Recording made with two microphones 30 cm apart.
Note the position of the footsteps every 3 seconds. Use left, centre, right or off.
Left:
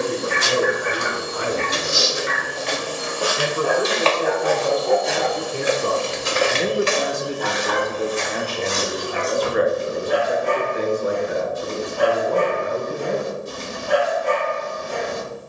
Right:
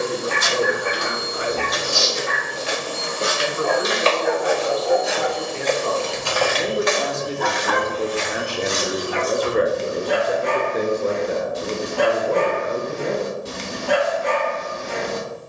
left, centre, left, left, off.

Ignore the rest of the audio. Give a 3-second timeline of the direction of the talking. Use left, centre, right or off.
left, left, centre, right, right.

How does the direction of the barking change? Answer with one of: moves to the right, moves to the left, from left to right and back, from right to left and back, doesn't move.
moves to the right.